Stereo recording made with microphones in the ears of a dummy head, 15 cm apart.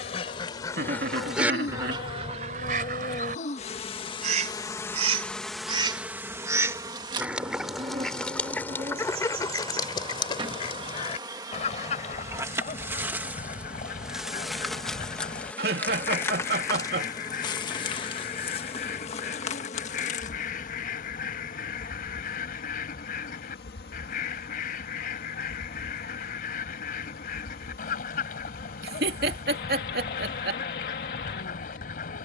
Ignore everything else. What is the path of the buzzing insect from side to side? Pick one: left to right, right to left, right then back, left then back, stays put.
right then back.